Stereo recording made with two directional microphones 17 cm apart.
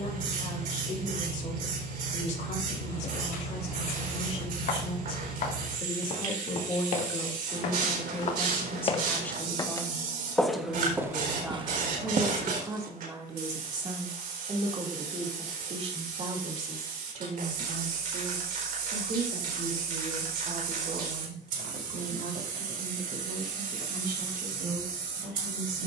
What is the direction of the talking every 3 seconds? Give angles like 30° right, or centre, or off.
50° left, 40° left, 20° left, centre, 20° right, 40° right, 60° right, 60° right, 70° right.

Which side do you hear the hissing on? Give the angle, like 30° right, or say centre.
60° right.